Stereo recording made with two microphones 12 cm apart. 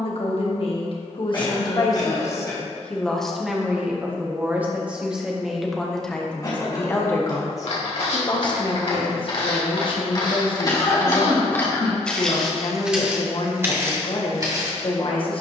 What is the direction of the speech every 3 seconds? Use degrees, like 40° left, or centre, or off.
40° left, 10° right, 30° left, 50° left, 50° left.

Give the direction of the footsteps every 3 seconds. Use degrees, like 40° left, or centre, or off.
off, off, 60° left, 40° left, 20° right.